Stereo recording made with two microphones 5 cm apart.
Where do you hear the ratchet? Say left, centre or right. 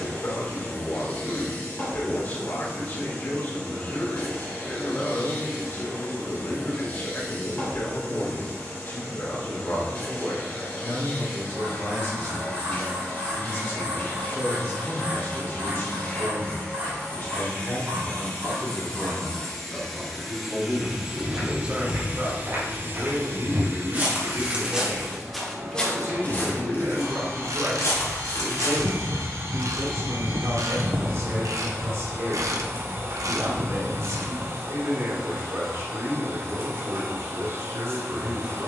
right.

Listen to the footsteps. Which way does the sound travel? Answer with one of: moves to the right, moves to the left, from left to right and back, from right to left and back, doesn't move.
moves to the left.